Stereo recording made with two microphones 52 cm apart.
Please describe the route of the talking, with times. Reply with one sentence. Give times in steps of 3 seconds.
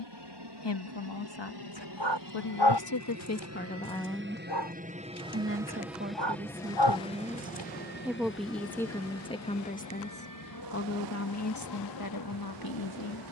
In this clip you hear the talking on the left from 0 s, in the centre from 3 s and on the left from 9 s.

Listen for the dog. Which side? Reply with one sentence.
In this clip you hear the dog on the left.